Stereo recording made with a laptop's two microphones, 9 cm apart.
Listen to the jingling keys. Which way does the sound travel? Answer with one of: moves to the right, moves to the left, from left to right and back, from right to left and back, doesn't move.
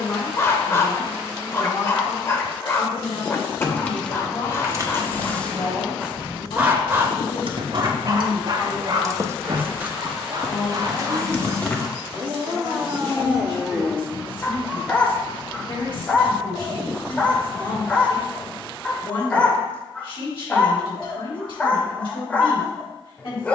from left to right and back.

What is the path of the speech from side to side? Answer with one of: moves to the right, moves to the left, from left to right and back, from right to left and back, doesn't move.
doesn't move.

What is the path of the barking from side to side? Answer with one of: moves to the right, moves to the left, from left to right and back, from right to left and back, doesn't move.
from left to right and back.